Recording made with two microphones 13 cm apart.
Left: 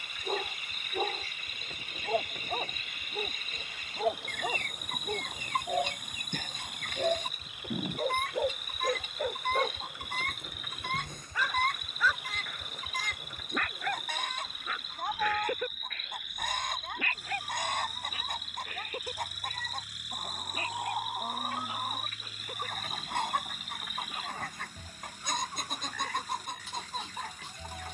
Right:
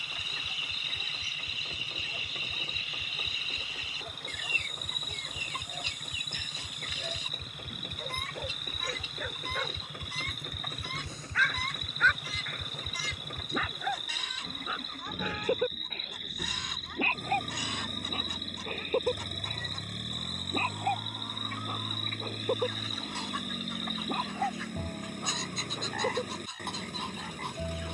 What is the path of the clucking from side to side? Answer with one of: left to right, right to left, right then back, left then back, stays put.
stays put.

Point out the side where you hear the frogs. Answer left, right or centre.
right.